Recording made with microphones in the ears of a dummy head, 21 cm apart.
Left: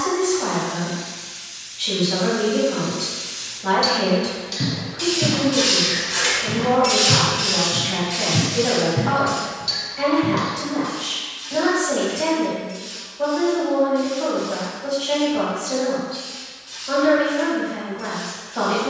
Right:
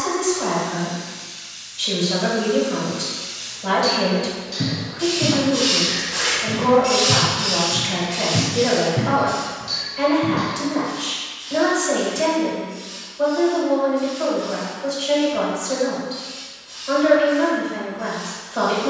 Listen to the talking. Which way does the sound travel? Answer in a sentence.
In this clip you hear the talking stay put.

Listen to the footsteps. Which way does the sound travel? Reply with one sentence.
In this clip you hear the footsteps travel towards the left.